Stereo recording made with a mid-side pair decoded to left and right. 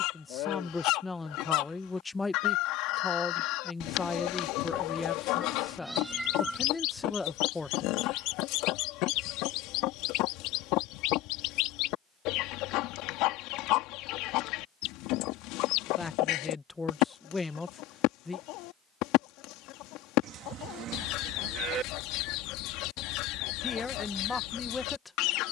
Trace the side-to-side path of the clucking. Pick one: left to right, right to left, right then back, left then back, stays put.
stays put.